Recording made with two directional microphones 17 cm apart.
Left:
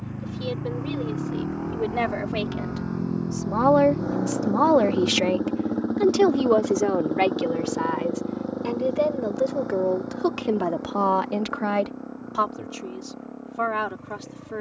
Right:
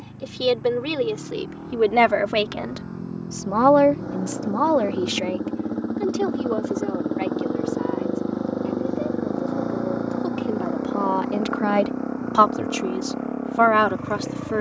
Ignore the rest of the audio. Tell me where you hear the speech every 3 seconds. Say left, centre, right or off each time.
right, centre, left, left, right.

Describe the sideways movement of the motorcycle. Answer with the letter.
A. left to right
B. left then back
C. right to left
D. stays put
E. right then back
A.